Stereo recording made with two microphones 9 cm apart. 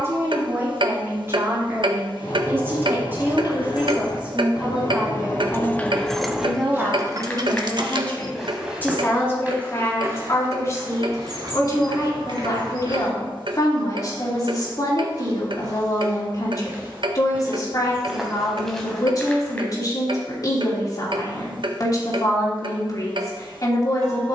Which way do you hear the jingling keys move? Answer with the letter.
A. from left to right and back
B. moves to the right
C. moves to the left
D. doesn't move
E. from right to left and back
B.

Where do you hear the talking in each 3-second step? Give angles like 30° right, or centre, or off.
30° right, 10° right, 10° left, 30° left, 40° left, 40° left, 40° left, 40° left.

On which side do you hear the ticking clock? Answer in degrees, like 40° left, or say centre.
60° right.